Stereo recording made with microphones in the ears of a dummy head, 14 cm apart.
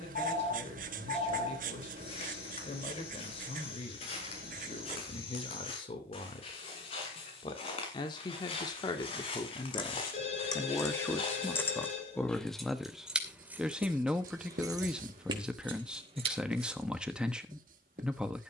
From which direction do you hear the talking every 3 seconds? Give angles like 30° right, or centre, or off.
40° left, 40° left, 30° left, 20° left, centre, 10° right.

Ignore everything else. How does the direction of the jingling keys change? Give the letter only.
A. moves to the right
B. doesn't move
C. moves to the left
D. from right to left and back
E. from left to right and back
A.